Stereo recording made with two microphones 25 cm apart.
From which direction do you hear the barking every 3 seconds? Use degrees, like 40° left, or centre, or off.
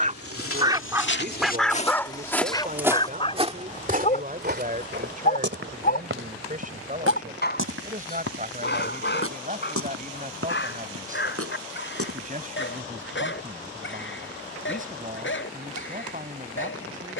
centre, 30° left, 40° left, 50° left, 50° left, 50° left.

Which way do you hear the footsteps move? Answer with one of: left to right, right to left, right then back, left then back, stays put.
left to right.